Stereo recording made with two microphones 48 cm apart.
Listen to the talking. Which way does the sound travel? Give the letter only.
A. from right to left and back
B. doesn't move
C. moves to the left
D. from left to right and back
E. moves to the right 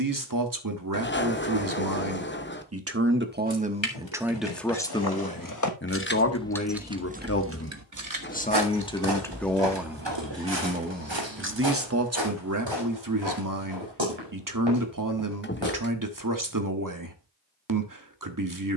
A.